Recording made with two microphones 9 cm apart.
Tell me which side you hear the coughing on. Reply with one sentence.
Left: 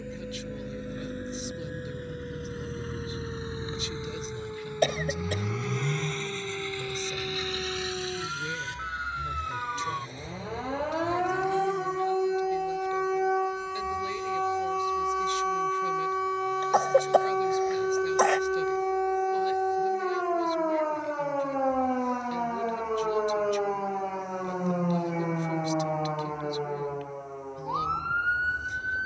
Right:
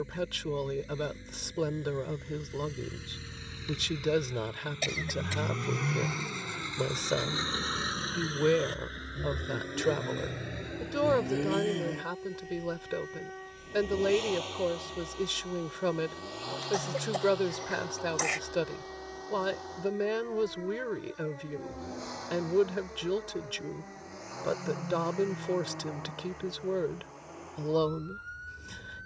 In this clip you hear the coughing on the left.